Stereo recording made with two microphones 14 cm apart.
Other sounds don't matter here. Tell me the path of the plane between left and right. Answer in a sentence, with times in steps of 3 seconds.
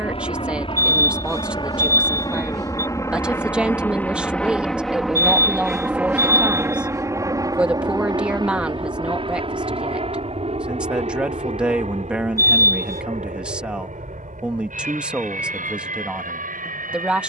You can hear the plane on the left from 0 s, in the centre from 3 s and on the right from 6 s.